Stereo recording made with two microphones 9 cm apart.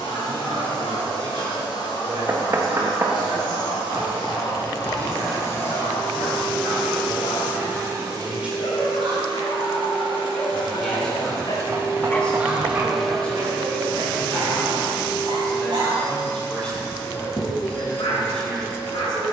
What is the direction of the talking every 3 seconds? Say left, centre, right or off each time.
right, right, right, centre, centre, centre, centre.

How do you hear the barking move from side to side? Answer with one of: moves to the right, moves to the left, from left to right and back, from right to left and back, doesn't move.
from left to right and back.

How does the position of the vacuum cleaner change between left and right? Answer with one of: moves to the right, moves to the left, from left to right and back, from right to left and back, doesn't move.
from left to right and back.